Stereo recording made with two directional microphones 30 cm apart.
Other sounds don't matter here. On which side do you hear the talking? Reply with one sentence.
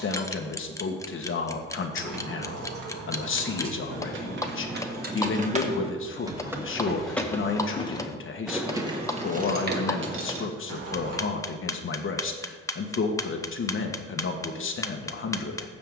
You can hear the talking on the left.